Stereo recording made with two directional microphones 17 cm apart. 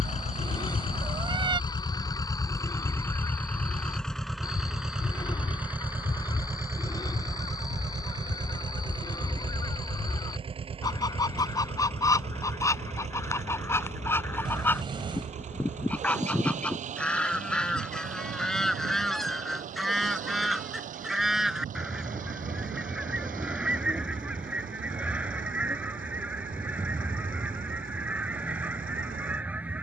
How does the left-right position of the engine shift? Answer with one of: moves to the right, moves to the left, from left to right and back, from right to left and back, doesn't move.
moves to the right.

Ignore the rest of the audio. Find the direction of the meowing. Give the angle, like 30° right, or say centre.
30° right.